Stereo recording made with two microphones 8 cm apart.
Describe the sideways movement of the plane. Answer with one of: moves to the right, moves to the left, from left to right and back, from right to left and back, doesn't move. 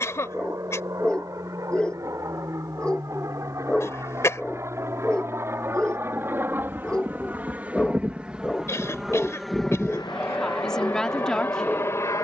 moves to the left.